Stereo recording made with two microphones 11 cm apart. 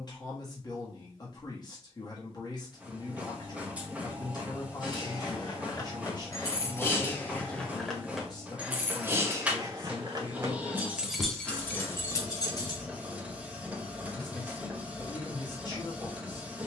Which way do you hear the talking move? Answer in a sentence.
You can hear the talking stay in one place.